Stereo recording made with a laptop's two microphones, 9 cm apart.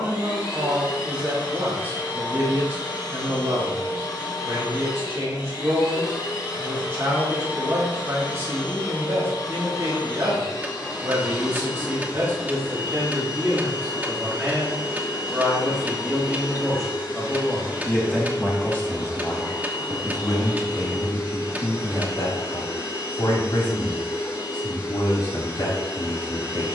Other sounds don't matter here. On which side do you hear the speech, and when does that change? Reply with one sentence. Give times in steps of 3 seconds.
You can hear the speech on the right from 0 s, in the centre from 15 s and on the left from 18 s.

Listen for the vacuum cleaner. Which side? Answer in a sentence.
In this clip you hear the vacuum cleaner on the left.